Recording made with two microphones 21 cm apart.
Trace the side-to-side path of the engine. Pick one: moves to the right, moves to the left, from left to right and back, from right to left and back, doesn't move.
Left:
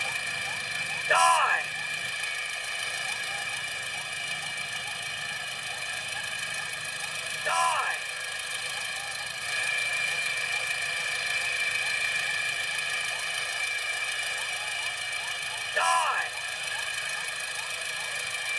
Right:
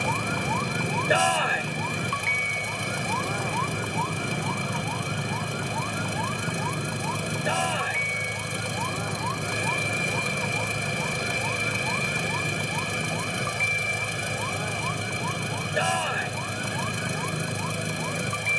doesn't move.